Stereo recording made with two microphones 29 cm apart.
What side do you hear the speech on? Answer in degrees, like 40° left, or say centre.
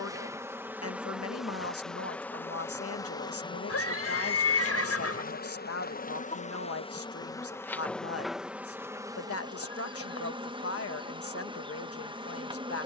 60° left.